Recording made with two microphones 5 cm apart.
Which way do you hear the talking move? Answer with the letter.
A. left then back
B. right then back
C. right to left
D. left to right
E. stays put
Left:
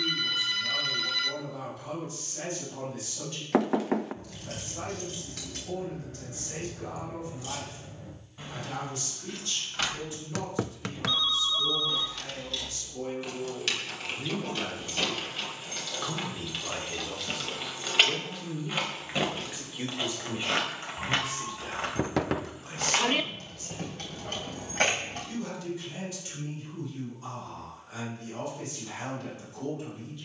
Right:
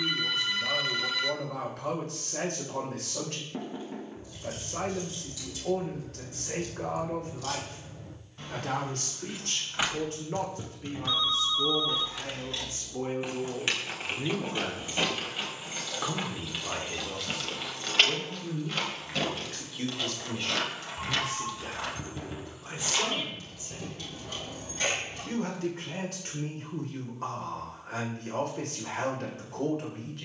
A.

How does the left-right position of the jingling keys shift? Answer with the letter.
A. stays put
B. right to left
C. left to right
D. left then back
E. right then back
E.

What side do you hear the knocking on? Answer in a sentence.
You can hear the knocking on the left.